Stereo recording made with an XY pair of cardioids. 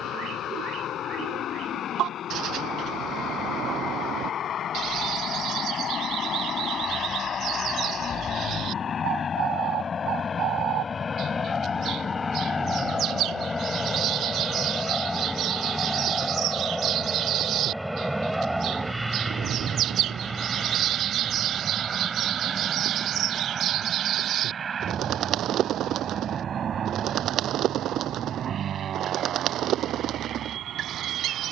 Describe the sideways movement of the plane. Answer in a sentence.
You can hear the plane travel towards the right.